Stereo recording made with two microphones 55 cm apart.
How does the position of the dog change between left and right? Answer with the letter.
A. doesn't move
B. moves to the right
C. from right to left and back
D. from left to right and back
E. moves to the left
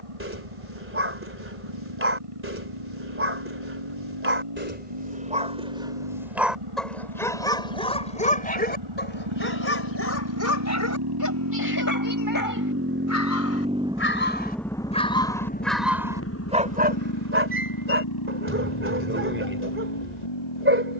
C.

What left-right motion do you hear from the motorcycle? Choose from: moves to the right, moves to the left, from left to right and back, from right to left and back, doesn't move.
moves to the left.